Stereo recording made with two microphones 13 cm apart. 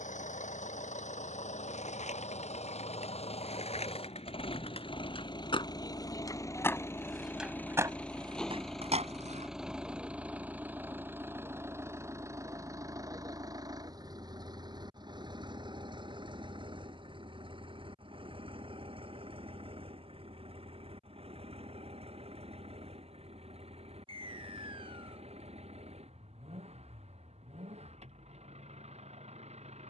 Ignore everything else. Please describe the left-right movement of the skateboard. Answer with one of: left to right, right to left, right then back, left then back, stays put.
left to right.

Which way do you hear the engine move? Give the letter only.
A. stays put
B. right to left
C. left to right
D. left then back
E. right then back
C.